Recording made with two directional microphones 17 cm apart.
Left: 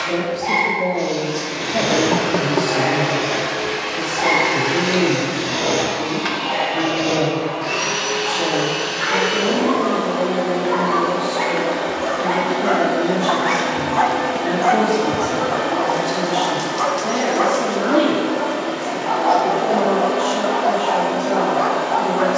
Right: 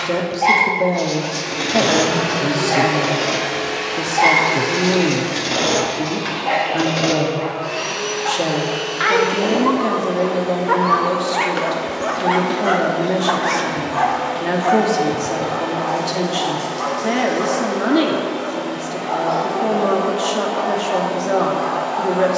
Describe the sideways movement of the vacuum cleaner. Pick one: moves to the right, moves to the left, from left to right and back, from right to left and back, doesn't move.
moves to the left.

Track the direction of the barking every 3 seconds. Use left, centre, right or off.
right, right, right, right, centre, left, left, left.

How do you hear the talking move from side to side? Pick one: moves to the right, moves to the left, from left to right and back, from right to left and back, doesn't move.
doesn't move.